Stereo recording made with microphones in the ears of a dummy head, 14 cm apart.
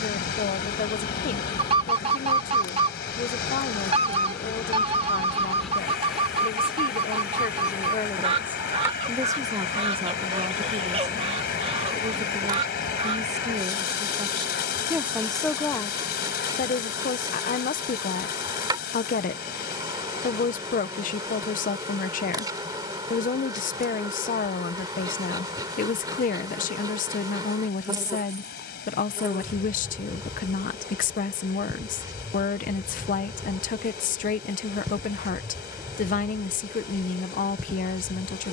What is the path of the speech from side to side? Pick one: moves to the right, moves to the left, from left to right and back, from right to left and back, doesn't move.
from left to right and back.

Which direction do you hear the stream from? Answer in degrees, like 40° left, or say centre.
70° left.